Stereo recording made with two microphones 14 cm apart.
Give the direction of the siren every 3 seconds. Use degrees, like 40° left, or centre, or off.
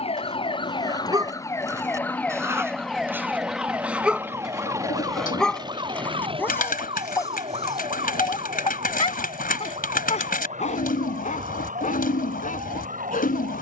20° left, 20° right, 40° right, 50° right, 50° right.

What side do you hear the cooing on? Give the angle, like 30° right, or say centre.
70° left.